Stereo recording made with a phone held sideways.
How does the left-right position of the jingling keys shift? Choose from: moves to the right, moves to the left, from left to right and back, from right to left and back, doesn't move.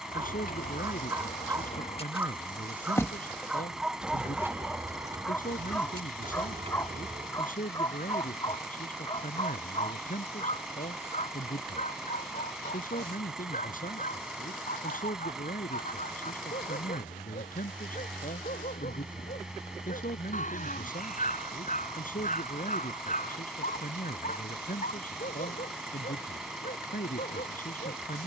moves to the right.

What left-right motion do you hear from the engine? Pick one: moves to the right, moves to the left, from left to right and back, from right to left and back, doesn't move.
doesn't move.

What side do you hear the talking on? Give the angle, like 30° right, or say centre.
60° left.